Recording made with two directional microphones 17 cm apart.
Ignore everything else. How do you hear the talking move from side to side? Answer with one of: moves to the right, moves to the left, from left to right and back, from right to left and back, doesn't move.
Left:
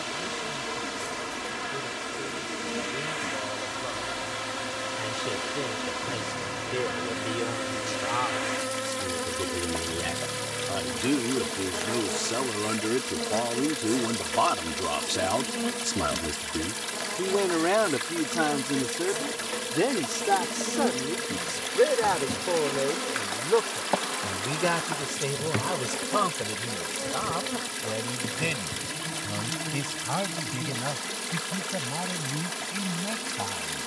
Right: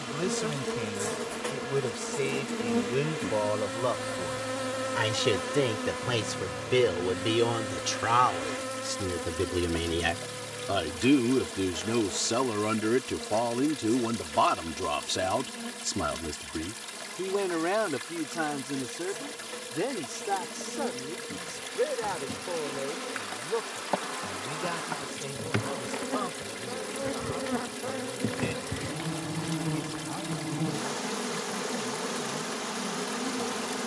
moves to the left.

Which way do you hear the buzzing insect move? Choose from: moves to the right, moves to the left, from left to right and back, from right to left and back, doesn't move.
from right to left and back.